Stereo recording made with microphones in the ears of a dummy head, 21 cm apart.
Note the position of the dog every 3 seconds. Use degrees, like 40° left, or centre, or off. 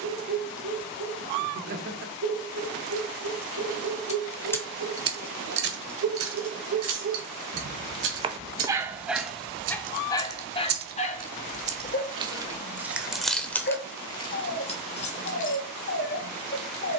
80° right, 70° right, 30° right, 20° left, 40° left, 50° left.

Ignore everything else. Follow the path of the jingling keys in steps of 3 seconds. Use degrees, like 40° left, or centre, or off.
off, 20° right, 70° right, 50° right, centre, 30° left.